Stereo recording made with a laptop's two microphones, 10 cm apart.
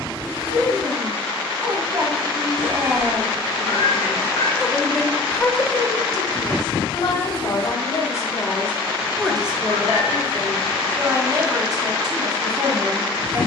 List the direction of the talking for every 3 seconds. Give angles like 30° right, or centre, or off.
40° right, centre, 40° left, 30° right, 40° right.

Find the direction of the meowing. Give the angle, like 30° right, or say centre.
70° left.